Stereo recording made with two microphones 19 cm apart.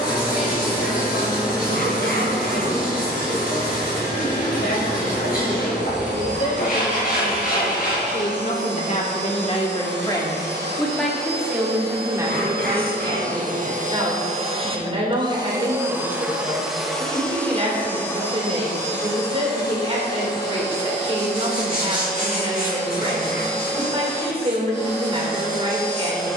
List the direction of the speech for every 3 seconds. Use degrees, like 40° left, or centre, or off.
80° left, 80° left, 60° left, 20° left, 30° right, 40° right, 40° right, 40° right, 40° right.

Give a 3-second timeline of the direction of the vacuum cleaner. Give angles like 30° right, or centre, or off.
80° right, 80° right, 80° right, 80° right, 50° right, centre, 20° left, 20° left, 20° left.